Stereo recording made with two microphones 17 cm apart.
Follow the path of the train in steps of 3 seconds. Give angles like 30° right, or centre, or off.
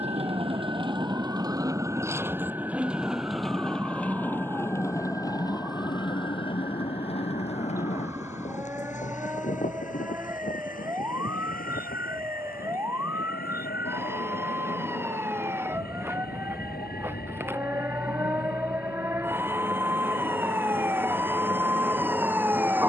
20° right, 10° left, 40° left, 50° left, 60° left, 60° left, 70° left, 70° left.